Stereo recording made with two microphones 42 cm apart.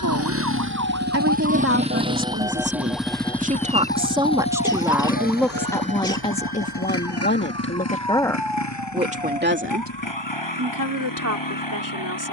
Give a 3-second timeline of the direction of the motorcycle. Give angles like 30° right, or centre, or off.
20° right, 10° left, 30° left, 50° left.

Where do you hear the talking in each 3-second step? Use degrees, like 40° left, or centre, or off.
30° right, 10° right, 10° left, 40° right.